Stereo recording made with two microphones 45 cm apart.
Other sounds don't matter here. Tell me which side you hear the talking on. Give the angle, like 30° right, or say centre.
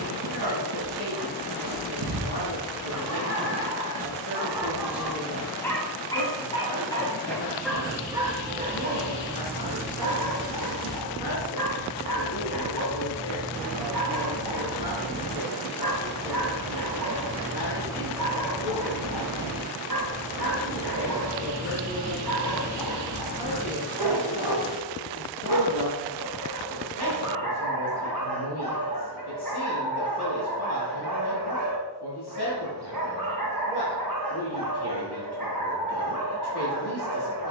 60° left.